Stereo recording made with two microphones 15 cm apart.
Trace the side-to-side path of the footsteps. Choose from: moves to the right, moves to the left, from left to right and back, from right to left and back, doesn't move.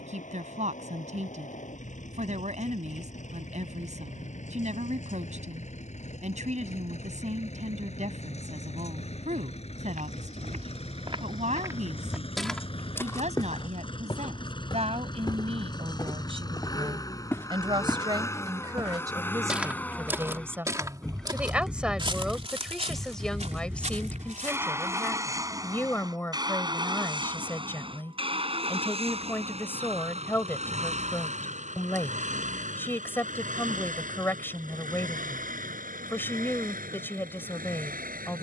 from right to left and back.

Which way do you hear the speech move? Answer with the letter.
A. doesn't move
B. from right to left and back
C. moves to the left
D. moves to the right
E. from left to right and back
C.